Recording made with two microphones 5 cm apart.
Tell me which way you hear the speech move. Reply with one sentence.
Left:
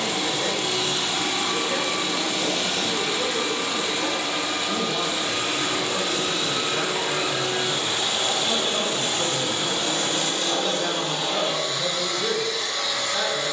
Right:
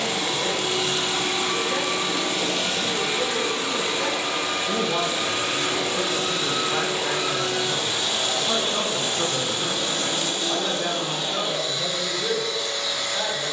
In this clip you hear the speech go right and come back.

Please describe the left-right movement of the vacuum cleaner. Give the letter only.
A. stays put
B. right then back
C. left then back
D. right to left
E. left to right
D.